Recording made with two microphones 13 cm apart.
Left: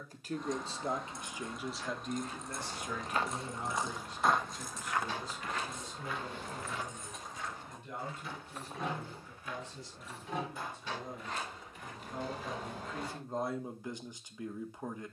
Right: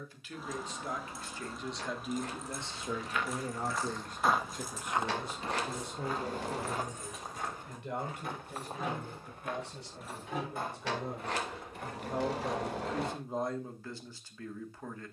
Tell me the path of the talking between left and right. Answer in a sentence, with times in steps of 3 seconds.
In this clip you hear the talking in the centre from 0 s, on the right from 3 s and in the centre from 12 s.